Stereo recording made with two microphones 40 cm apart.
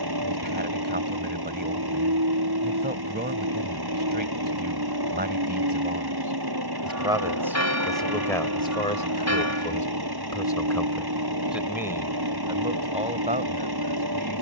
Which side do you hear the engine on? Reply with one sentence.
In this clip you hear the engine on the right.